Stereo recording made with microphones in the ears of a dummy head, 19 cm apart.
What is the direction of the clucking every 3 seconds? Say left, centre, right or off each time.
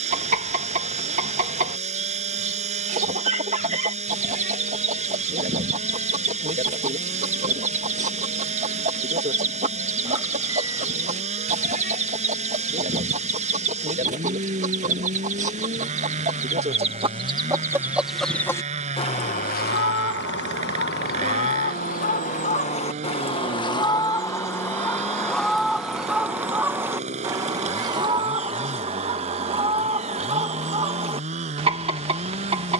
right, right, right, right, right, right, left, left, centre, right, right.